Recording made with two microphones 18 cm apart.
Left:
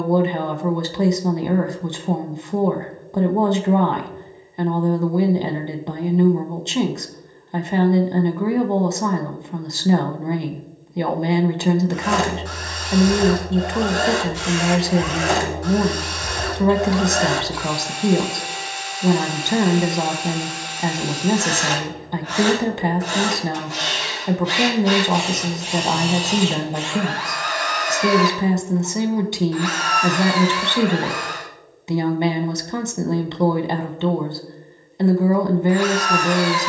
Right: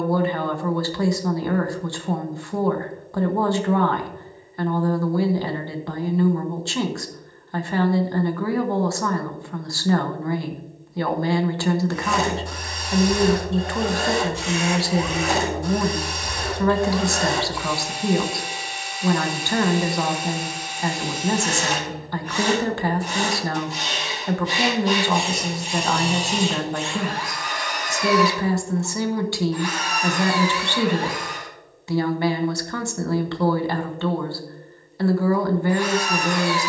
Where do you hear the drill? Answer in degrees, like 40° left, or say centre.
80° left.